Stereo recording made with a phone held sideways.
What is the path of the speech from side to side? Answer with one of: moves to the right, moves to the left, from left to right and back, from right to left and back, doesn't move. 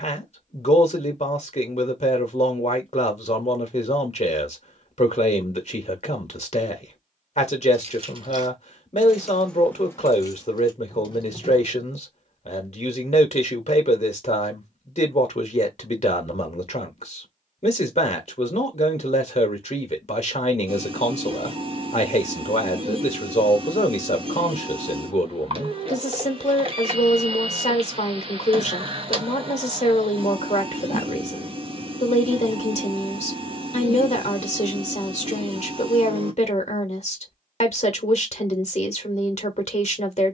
doesn't move.